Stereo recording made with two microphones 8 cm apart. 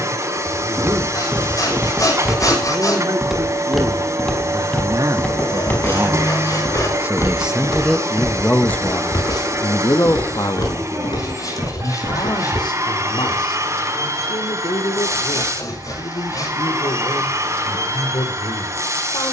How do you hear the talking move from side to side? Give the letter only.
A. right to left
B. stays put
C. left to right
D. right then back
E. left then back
A.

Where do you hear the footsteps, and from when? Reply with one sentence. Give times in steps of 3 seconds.
In this clip you hear the footsteps on the right from 0 s, in the centre from 3 s, on the left from 6 s and not at all from 15 s.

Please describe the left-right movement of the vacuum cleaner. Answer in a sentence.
In this clip you hear the vacuum cleaner stay in one place.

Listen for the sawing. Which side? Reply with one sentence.
In this clip you hear the sawing on the left.